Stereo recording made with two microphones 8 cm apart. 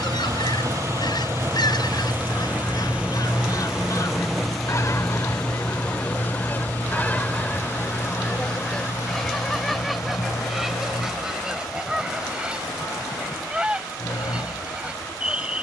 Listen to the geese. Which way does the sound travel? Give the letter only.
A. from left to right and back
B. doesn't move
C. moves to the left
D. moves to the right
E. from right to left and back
D.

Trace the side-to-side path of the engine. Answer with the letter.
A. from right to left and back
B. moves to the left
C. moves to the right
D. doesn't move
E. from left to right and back
B.